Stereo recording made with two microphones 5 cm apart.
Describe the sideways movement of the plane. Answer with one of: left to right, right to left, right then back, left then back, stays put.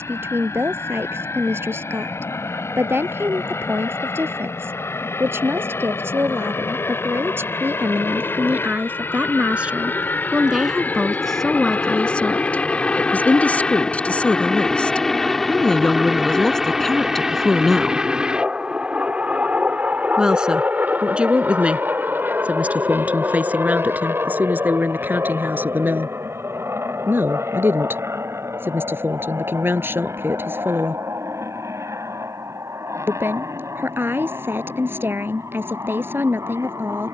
left to right.